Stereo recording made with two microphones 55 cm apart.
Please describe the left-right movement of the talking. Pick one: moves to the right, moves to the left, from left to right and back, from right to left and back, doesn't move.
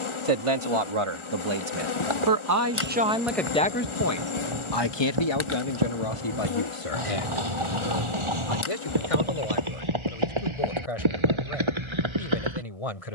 moves to the left.